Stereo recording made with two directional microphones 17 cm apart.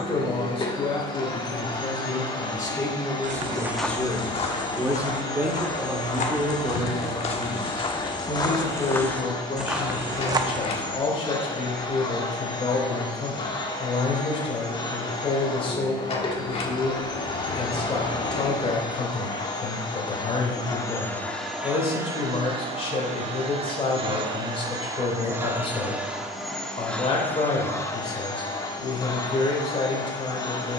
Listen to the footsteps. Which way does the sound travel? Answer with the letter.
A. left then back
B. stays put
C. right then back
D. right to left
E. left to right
A.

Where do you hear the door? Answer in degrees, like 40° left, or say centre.
40° left.